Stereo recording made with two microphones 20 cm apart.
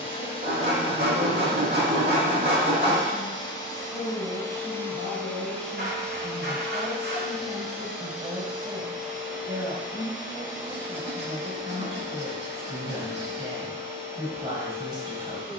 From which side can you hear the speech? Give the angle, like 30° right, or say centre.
20° right.